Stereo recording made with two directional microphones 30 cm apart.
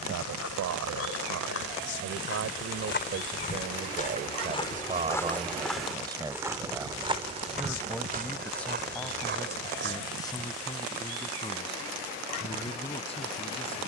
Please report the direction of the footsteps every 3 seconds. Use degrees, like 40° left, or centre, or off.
50° left, 20° left, 20° right, 40° right, off.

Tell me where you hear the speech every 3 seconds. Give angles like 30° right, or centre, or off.
60° right, 30° right, centre, 10° left, 20° left.